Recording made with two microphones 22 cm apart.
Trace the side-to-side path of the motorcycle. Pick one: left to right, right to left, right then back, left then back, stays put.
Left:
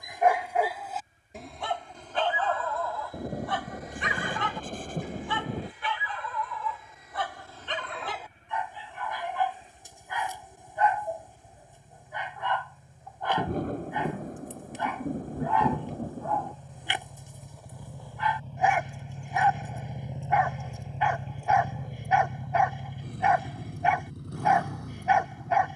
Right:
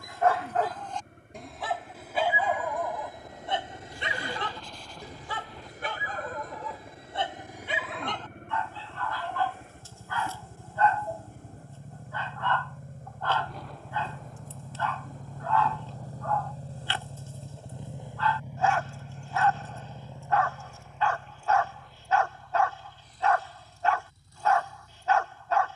right to left.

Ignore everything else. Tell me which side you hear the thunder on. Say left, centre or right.
left.